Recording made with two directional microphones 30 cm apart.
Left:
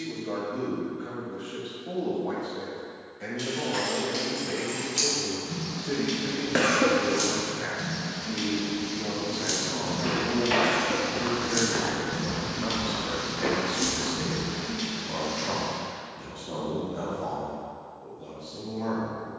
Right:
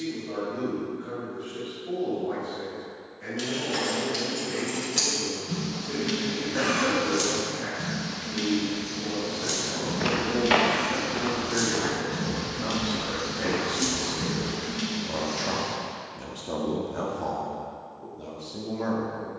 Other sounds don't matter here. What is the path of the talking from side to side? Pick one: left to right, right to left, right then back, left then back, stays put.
left to right.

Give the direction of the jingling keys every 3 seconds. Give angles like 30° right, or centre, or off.
off, 20° right, 10° right, 20° left, centre, 30° right, off.